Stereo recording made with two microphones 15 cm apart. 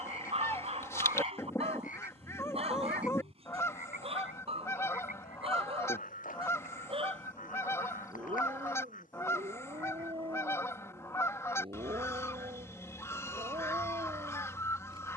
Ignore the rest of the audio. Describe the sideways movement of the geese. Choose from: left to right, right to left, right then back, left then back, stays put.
stays put.